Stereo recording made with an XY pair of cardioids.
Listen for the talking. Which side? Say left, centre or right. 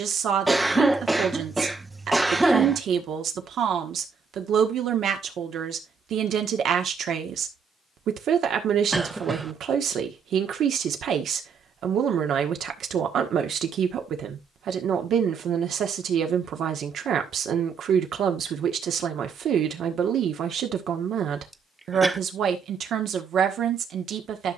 right.